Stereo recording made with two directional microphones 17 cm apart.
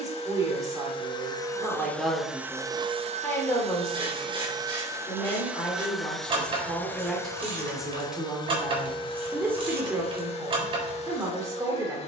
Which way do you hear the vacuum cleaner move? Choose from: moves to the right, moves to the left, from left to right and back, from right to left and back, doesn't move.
from left to right and back.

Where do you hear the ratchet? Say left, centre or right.
right.